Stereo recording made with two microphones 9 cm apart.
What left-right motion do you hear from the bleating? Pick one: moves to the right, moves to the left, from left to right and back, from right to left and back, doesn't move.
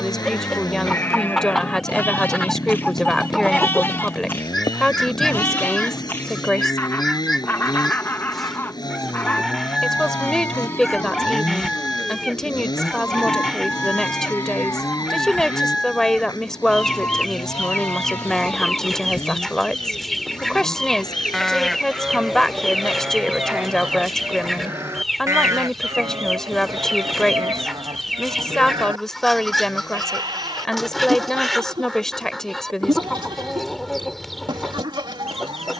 moves to the right.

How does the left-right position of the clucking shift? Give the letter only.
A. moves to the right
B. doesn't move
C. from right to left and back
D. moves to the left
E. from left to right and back
B.